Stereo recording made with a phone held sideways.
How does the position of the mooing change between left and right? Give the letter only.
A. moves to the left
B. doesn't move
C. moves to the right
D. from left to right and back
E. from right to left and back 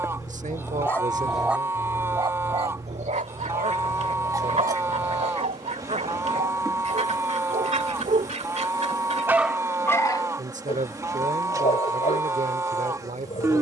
B.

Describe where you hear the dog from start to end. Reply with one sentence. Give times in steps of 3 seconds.
You can hear the dog in the centre from 0 s, on the right from 3 s and on the left from 9 s.